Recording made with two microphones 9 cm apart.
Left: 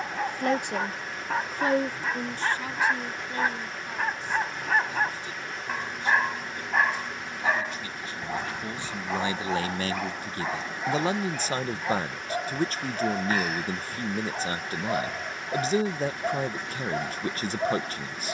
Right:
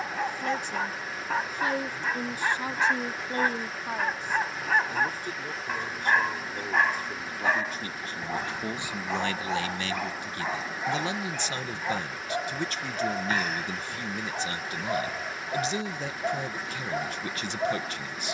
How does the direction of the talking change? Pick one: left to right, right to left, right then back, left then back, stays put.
right then back.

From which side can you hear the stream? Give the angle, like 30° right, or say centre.
centre.